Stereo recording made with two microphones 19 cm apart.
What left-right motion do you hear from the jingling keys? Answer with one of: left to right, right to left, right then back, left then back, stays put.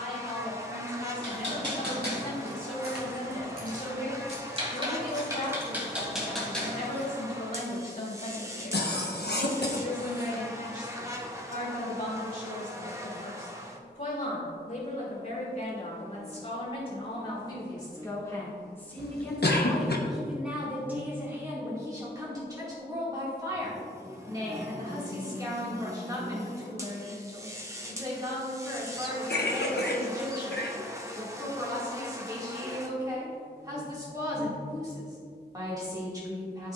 right to left.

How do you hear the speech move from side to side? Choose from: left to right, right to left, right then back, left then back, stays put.
left to right.